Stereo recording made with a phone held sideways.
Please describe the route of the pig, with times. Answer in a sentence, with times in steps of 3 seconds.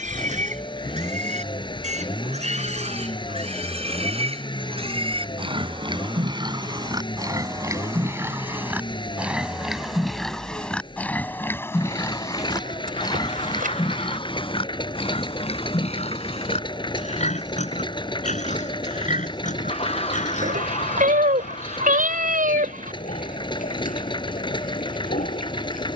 You can hear the pig on the right from 0 s, in the centre from 9 s and on the left from 12 s.